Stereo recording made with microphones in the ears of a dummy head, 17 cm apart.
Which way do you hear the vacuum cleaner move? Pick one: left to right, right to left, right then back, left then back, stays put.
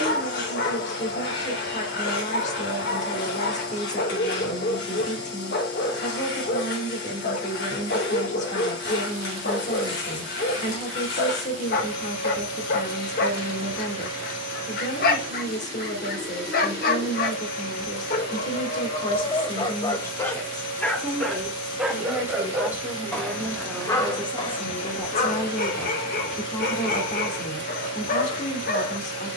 stays put.